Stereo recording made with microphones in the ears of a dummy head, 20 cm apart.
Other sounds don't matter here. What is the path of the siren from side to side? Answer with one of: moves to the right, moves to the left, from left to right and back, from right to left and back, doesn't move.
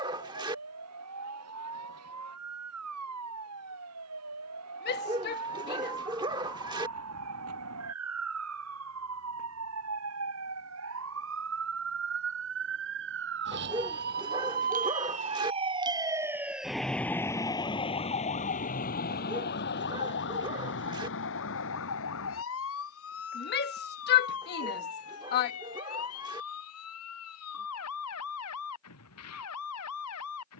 moves to the left.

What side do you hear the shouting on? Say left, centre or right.
left.